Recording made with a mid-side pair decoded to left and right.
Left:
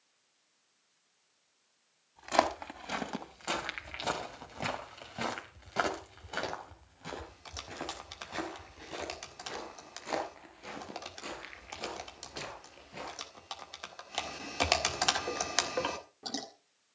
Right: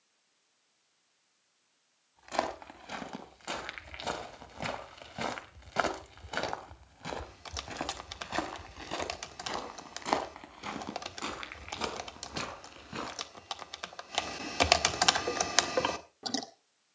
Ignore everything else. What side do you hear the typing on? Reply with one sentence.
You can hear the typing on the right.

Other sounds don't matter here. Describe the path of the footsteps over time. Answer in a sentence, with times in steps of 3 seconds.
You can hear the footsteps on the left from 0 s, in the centre from 3 s, on the right from 6 s and not at all from 15 s.